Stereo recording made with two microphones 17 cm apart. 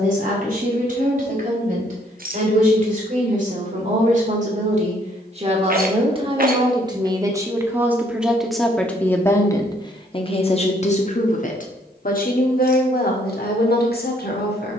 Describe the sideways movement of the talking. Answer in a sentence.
In this clip you hear the talking move to the left.